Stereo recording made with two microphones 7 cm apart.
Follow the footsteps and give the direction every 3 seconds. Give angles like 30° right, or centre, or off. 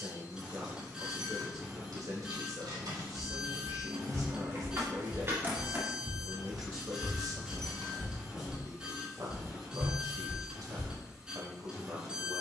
off, 40° right, 10° right, 10° left.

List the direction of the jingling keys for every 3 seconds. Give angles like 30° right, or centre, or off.
70° right, 40° right, centre, off.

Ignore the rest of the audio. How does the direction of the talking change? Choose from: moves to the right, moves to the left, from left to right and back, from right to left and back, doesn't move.
doesn't move.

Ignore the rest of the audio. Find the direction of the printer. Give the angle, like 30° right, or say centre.
10° right.